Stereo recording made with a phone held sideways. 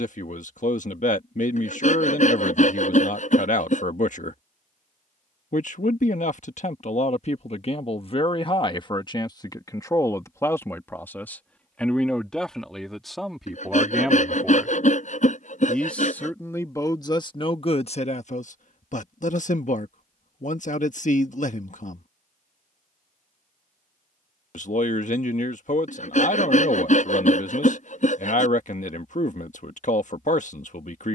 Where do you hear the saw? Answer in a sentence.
In this clip you hear the saw on the left.